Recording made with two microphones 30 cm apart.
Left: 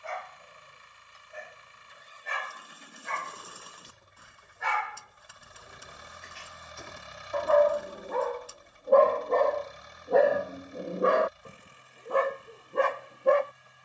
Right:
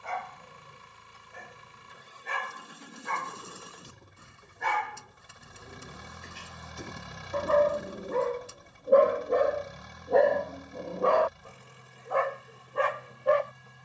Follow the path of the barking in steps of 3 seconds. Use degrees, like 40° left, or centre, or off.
60° right, 50° right, 40° right, centre, 50° left.